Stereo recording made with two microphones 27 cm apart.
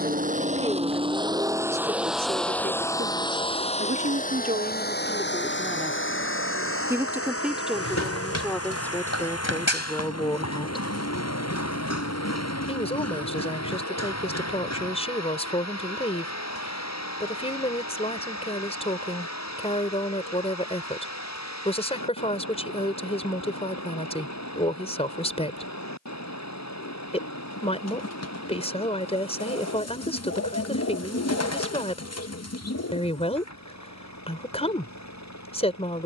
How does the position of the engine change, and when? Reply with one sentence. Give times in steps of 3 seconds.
You can hear the engine in the centre from 0 s and on the left from 3 s.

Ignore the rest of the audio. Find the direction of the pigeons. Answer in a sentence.
You can hear the pigeons on the left.